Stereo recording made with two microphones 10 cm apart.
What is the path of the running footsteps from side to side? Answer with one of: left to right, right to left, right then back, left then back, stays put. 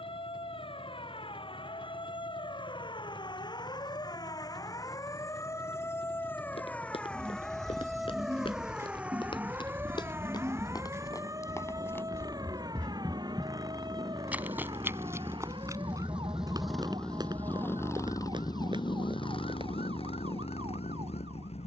left to right.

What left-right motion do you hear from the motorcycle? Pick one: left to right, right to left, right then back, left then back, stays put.
right to left.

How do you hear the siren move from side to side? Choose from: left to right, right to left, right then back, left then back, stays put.
left to right.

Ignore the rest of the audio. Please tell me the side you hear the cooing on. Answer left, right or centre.
right.